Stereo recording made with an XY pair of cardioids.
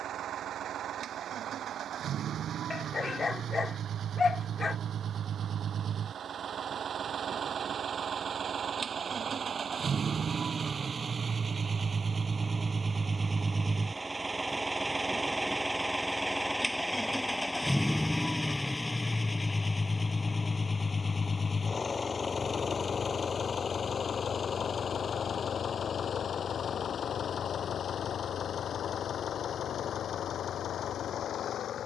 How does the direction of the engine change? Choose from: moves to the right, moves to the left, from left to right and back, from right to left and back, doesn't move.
moves to the left.